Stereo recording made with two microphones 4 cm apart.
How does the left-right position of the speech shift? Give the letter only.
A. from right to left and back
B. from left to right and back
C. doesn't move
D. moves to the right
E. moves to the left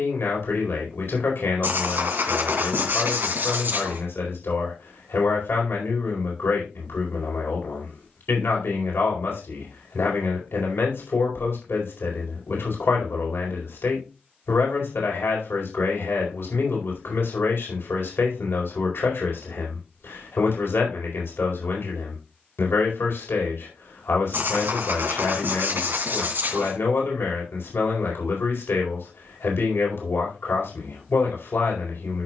C.